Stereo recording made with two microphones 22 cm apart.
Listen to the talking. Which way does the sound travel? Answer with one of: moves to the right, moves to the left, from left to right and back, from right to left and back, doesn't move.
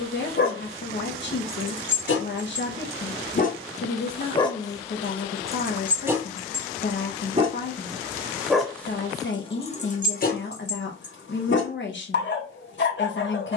doesn't move.